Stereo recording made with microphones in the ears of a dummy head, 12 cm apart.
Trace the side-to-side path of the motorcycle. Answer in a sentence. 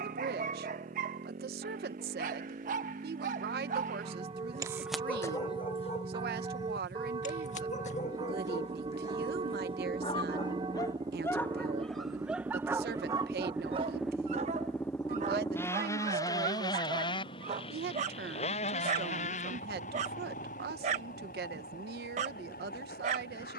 You can hear the motorcycle travel towards the left.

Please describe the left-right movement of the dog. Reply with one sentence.
In this clip you hear the dog go left and come back.